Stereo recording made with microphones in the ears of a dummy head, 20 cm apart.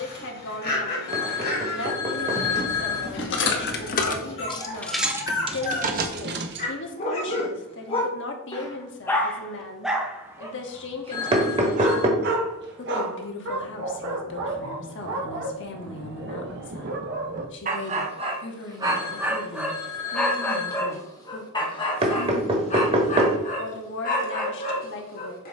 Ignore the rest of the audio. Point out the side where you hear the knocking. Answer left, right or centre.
right.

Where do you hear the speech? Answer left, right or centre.
left.